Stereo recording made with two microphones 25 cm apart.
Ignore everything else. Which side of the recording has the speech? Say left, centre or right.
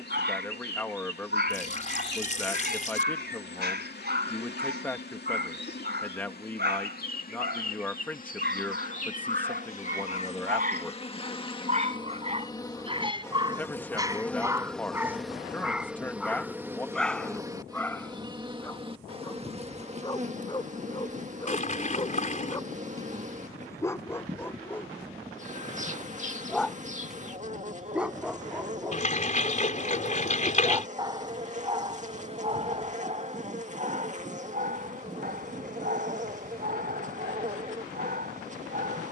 centre.